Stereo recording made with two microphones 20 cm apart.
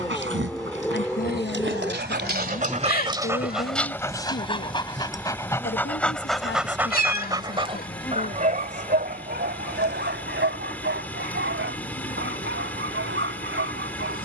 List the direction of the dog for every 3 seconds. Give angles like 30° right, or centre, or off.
70° right, 10° left, 20° right, 70° right, 80° right.